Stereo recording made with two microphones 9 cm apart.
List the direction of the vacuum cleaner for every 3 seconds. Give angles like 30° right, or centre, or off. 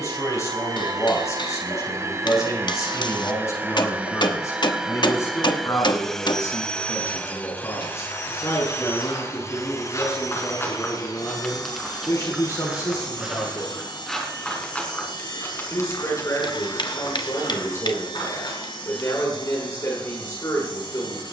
40° right, 10° right, 20° left, 40° left, 60° left, 60° left, 70° left.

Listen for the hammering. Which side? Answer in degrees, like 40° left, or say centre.
60° left.